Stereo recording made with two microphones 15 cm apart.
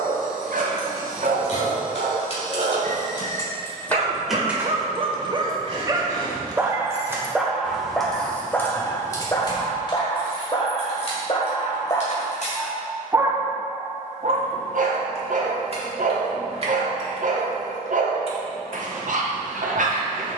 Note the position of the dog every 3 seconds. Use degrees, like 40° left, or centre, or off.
60° right, 40° right, centre, 30° left, 20° right, 60° right, 60° right.